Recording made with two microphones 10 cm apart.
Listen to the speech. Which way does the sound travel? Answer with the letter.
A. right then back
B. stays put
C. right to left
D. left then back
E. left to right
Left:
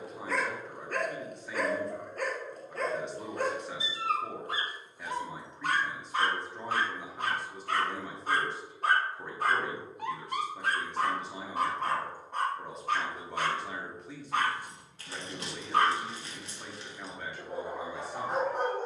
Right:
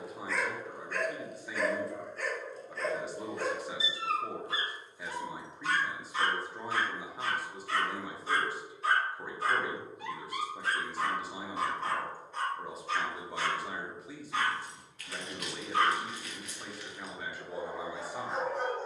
B.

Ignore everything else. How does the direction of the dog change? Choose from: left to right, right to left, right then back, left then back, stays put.
stays put.